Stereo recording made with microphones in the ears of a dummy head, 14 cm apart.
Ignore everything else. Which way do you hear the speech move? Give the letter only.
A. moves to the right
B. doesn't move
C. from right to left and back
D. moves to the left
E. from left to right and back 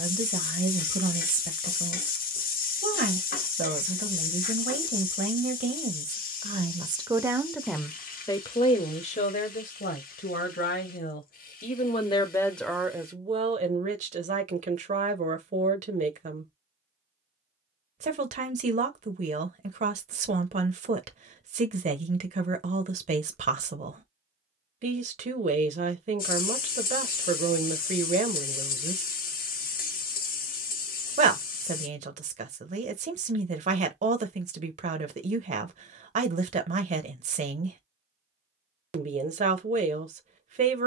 C.